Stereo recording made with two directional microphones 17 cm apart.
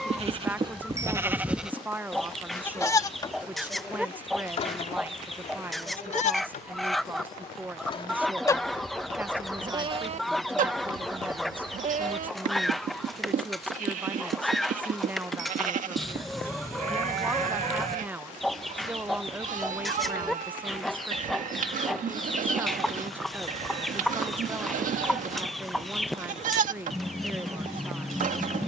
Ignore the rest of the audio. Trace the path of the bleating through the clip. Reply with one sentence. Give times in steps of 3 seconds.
In this clip you hear the bleating in the centre from 0 s, on the left from 3 s and on the right from 9 s.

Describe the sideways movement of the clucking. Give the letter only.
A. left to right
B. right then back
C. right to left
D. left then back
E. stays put
E.